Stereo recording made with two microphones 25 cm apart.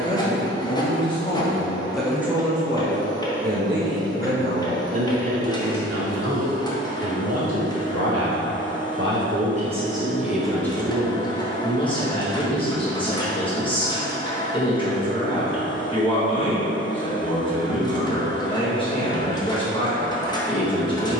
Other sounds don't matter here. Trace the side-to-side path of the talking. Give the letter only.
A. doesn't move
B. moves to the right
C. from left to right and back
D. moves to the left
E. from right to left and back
C.